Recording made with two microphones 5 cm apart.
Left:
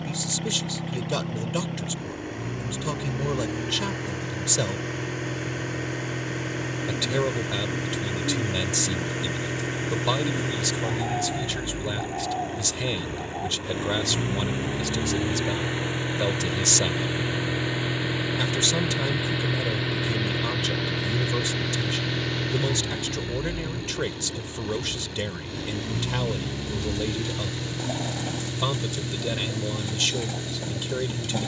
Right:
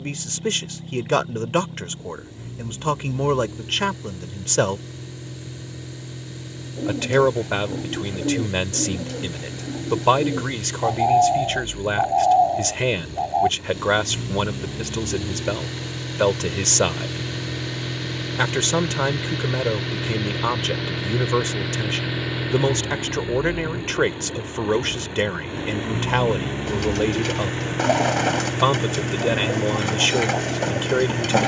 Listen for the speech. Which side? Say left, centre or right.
right.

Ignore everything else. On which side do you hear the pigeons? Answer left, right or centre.
right.